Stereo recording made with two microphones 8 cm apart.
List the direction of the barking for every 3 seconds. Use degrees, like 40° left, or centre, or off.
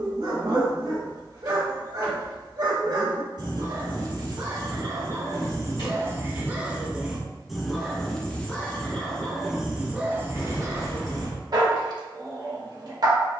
60° right, 50° right, centre, 30° right, 50° right.